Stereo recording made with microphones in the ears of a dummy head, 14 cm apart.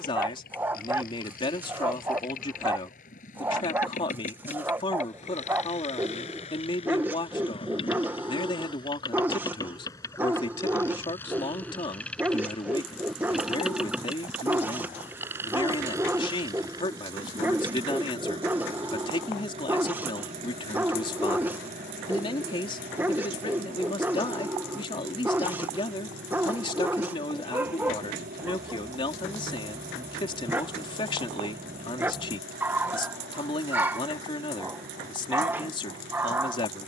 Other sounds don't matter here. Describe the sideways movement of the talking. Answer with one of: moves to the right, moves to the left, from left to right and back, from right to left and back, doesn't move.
doesn't move.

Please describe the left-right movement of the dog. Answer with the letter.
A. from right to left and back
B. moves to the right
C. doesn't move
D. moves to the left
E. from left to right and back
C.